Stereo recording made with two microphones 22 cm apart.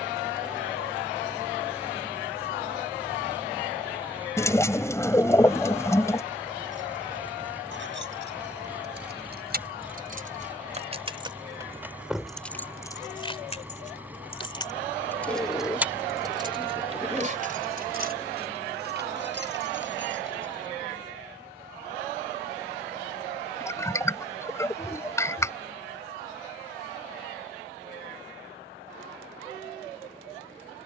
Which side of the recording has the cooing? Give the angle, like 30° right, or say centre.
10° left.